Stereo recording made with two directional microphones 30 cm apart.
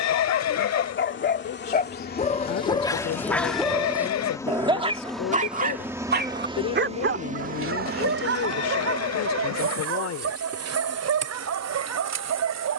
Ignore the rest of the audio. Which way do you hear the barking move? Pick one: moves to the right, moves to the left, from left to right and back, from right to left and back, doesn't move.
moves to the right.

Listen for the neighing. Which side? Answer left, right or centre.
left.